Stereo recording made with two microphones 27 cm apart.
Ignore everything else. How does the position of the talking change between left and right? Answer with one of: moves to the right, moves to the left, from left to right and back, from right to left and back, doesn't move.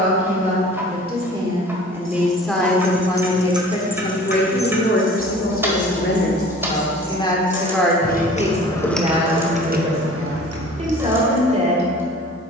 from right to left and back.